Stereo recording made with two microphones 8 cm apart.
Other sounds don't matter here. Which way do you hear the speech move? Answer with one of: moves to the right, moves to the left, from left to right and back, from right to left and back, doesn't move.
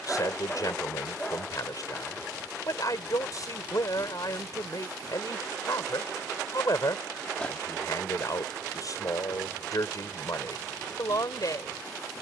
doesn't move.